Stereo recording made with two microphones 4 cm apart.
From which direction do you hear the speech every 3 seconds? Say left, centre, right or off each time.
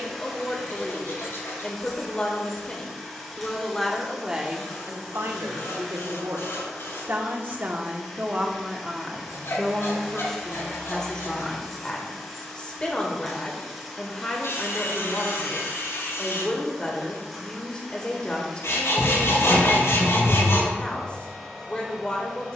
left, right, right, centre, left, left, left, left.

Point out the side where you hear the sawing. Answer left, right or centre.
left.